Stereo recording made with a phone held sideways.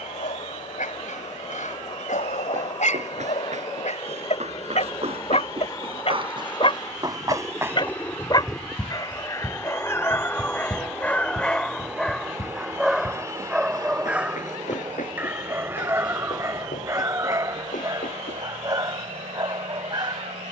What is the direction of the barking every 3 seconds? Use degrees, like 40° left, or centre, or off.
70° left, 60° left, 40° left, 20° left, centre, 20° right, 30° right.